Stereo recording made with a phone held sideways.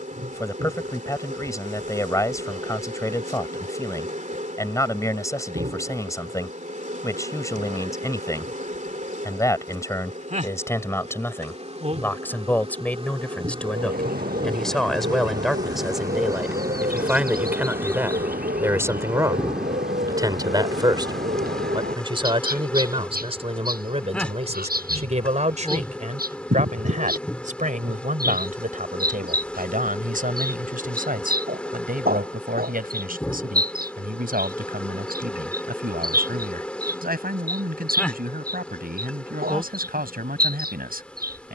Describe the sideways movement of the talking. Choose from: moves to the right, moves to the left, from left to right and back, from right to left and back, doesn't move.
moves to the right.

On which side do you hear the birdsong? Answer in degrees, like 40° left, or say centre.
80° right.